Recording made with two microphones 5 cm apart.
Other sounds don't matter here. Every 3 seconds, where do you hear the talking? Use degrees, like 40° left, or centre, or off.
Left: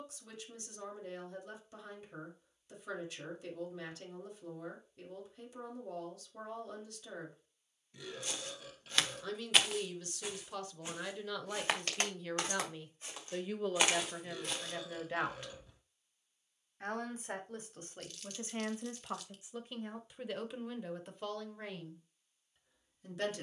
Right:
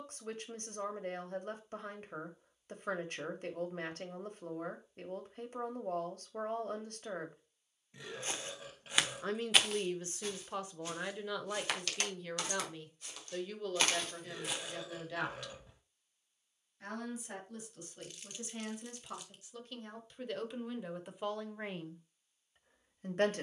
50° right, 50° right, 50° right, 20° right, 10° left, 40° left, 20° left, 30° right.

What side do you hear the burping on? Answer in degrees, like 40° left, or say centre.
30° right.